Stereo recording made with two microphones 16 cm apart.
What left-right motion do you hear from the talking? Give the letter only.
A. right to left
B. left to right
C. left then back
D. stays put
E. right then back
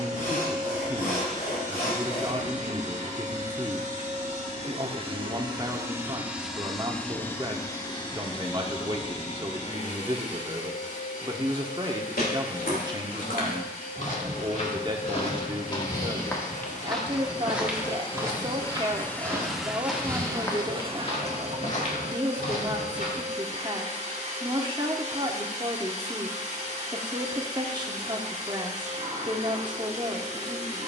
D.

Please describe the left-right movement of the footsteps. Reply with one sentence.
You can hear the footsteps go right and come back.